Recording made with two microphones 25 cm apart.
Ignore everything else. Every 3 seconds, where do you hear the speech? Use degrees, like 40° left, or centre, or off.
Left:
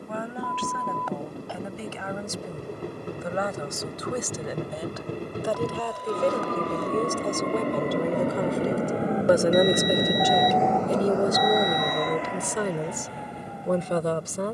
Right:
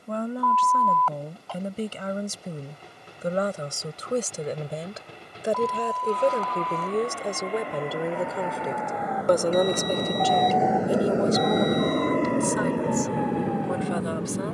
40° right, 30° right, 10° right, 20° left, 40° left.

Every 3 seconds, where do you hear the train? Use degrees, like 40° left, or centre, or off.
60° left, 60° left, 50° left, centre, 60° right.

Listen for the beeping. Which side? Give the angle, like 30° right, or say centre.
10° left.